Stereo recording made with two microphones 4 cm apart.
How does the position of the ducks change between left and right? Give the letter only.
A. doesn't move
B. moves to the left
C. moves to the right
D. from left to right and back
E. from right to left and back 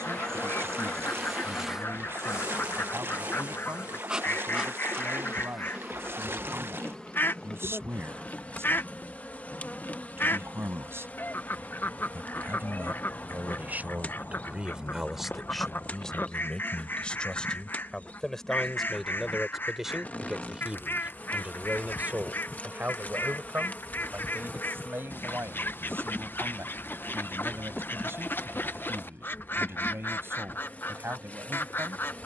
A.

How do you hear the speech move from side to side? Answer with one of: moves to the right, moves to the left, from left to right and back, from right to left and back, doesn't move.
from right to left and back.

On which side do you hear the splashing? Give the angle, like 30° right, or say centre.
70° right.